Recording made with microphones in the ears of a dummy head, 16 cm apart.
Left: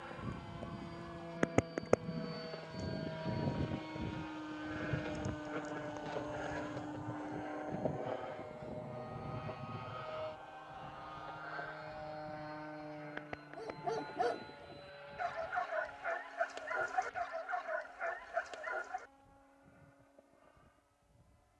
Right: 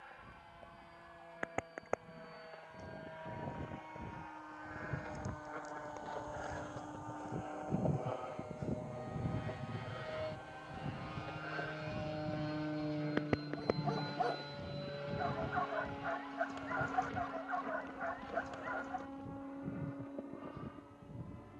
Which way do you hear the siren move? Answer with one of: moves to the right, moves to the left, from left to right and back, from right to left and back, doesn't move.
moves to the right.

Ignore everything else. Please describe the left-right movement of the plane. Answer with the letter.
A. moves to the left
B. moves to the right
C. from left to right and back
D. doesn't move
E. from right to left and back
B.